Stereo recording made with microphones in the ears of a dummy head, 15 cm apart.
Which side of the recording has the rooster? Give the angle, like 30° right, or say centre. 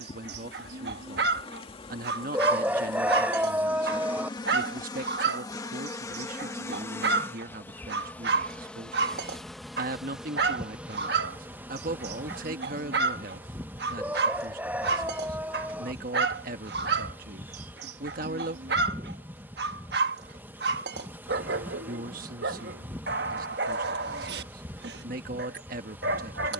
10° right.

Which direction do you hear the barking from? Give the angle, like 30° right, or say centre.
70° right.